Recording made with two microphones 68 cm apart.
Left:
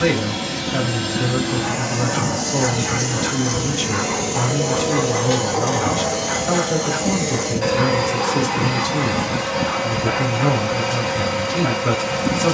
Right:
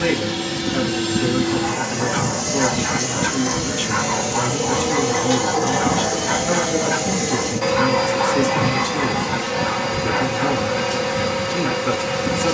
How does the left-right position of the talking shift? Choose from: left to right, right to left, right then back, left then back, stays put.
stays put.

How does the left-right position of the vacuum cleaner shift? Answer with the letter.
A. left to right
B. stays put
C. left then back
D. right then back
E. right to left
D.